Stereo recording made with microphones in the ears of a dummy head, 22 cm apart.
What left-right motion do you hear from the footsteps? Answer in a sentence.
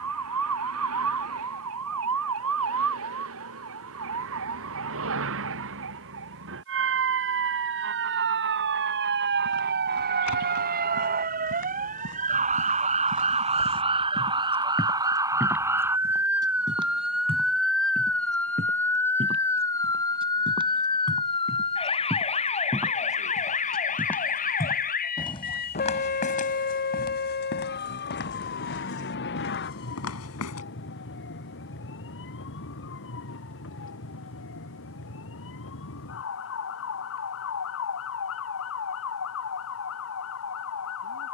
You can hear the footsteps go right and come back.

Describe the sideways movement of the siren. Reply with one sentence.
You can hear the siren go from the right side to the left.